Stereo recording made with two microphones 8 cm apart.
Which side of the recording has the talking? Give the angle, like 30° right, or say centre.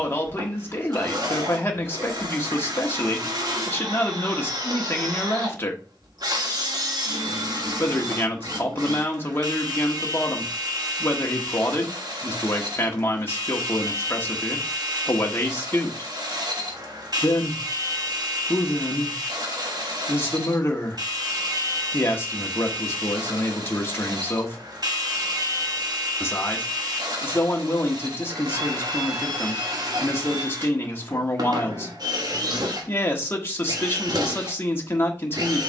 30° left.